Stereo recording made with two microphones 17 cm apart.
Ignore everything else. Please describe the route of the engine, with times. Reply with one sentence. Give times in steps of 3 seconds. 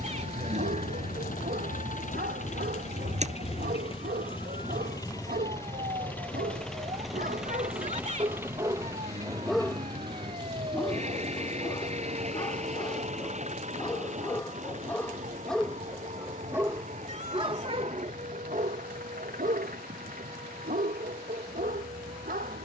You can hear the engine on the left from 0 s, in the centre from 6 s and on the right from 9 s.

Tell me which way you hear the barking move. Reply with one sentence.
You can hear the barking go left and come back.